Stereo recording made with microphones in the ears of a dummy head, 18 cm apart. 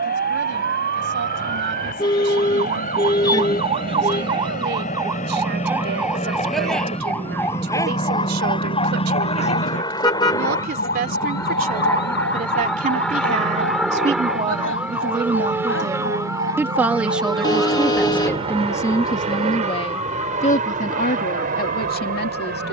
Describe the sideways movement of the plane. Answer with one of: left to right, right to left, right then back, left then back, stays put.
left to right.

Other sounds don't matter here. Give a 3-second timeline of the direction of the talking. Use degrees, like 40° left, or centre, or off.
70° right, 60° right, 60° right, 50° right, 40° right, 10° right, 20° left, 50° left.